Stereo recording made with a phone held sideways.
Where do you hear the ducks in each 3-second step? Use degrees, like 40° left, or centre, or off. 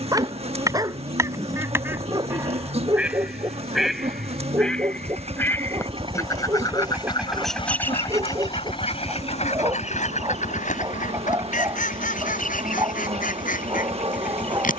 20° right, centre, 40° left, 60° left, 70° left.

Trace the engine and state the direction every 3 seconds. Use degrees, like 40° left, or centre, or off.
70° right, 50° right, centre, 60° left, 70° left.